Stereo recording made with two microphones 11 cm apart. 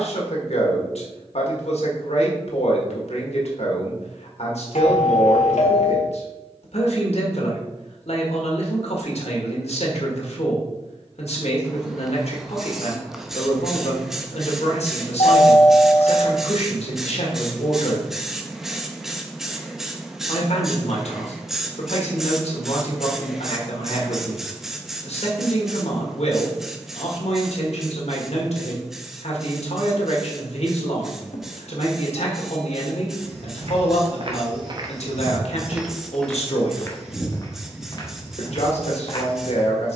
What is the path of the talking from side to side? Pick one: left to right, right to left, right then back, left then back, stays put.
stays put.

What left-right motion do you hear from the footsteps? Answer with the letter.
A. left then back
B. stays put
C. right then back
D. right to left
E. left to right
D.